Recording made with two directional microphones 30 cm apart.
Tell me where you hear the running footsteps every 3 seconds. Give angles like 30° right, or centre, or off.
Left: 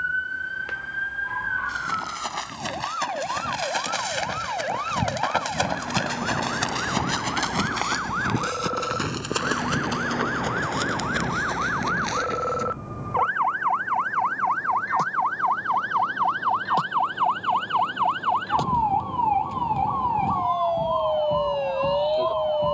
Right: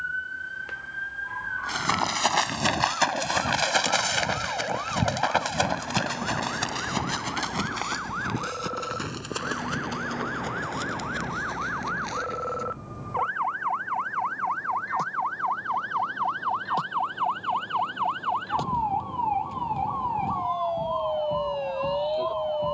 50° right, 20° right, 30° left, 50° left, 60° left, off, off, off.